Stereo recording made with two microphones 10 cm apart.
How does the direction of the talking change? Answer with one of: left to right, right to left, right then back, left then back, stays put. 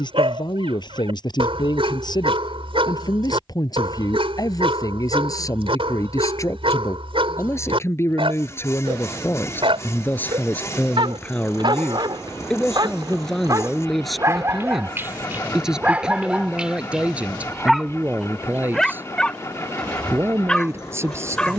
left to right.